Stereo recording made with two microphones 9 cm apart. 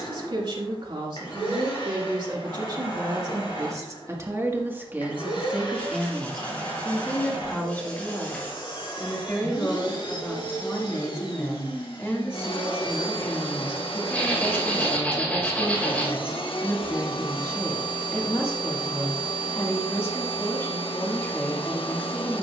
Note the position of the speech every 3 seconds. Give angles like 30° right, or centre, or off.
60° right, 30° right, 10° left, 30° left, 30° left, 30° left, 30° left, 30° left.